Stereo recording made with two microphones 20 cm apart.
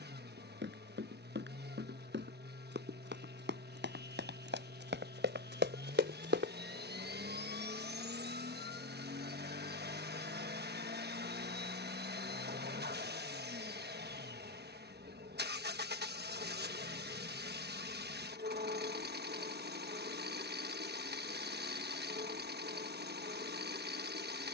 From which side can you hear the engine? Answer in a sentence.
In this clip you hear the engine on the right.